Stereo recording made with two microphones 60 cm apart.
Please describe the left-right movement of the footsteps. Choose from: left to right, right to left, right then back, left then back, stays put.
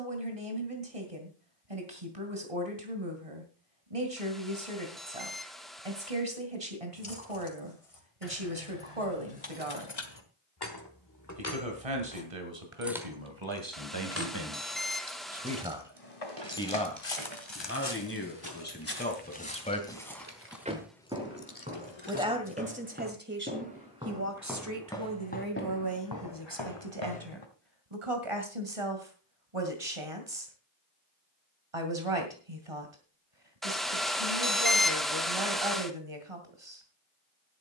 right then back.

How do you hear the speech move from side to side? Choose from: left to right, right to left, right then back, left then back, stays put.
left then back.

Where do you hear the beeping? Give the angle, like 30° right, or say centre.
centre.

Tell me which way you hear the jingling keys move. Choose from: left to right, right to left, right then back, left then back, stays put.
right then back.